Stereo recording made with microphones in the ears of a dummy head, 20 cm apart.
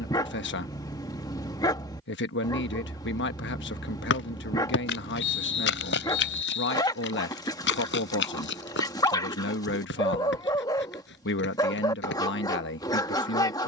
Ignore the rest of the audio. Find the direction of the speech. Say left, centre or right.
left.